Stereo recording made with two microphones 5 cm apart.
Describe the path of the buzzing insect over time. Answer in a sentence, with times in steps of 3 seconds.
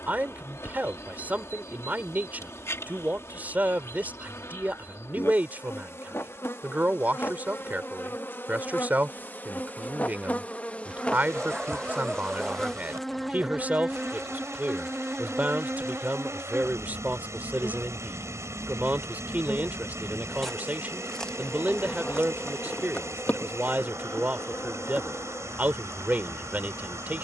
You can hear the buzzing insect on the left from 0 s, in the centre from 12 s, on the right from 15 s, in the centre from 18 s and on the left from 21 s.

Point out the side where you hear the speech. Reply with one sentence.
You can hear the speech on the right.